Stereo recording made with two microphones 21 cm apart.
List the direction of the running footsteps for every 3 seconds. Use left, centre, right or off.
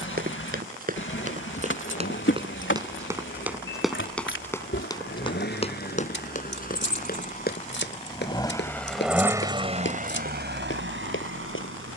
right, centre, left, left.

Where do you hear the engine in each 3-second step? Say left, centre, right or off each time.
left, left, left, right.